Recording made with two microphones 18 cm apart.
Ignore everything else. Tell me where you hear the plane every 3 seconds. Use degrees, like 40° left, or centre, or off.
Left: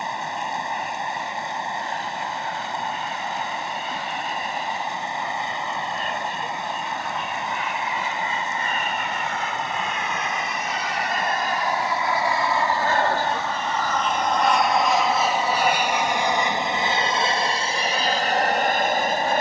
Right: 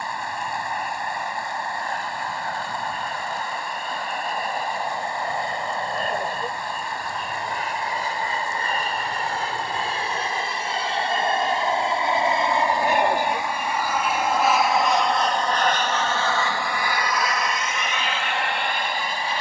50° right, 50° right, 40° right, 30° right, 10° right, 20° left, 40° left.